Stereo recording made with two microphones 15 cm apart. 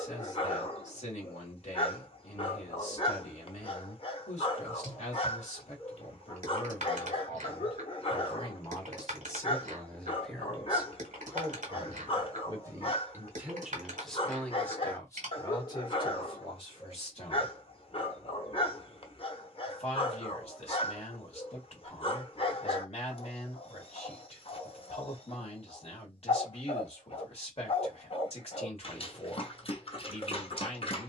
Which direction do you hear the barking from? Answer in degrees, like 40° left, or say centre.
40° left.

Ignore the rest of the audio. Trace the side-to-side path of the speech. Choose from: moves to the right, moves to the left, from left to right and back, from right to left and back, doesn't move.
from left to right and back.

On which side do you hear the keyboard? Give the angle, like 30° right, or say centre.
60° right.